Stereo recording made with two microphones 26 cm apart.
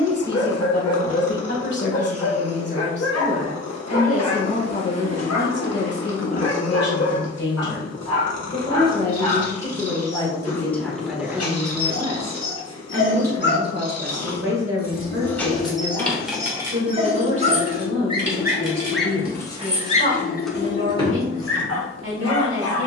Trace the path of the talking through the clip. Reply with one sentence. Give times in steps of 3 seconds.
In this clip you hear the talking on the left from 0 s, in the centre from 9 s and on the right from 12 s.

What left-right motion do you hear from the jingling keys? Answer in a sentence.
You can hear the jingling keys go right and come back.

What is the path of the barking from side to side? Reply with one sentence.
In this clip you hear the barking move from left to right and back again.